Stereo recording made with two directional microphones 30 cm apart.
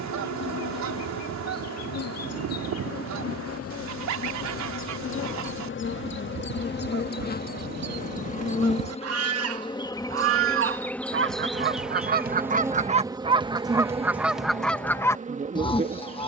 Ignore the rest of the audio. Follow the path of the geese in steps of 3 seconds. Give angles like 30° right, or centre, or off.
70° right, 70° right, 60° right, 40° right, 10° right, 20° left.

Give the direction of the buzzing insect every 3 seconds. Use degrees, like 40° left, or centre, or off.
60° left, 50° left, 30° left, 10° left, 10° right, 20° right.